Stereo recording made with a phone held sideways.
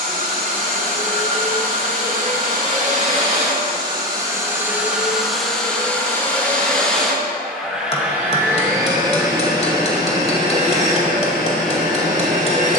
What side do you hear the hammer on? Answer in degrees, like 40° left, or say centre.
40° left.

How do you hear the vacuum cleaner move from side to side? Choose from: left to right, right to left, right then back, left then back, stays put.
left then back.